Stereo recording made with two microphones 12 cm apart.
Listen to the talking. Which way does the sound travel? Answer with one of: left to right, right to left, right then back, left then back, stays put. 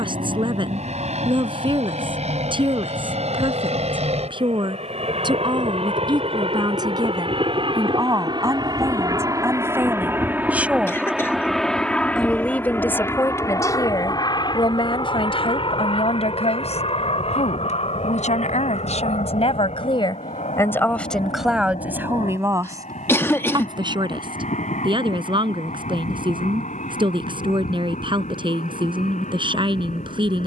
left then back.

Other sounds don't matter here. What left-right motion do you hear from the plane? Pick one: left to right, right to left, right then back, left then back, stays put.
right to left.